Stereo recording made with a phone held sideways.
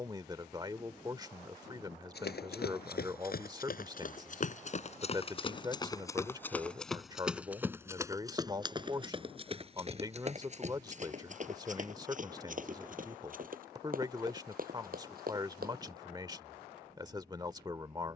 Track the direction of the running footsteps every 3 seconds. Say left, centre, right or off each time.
left, left, centre, right, right, right.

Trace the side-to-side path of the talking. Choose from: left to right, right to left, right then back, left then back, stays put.
stays put.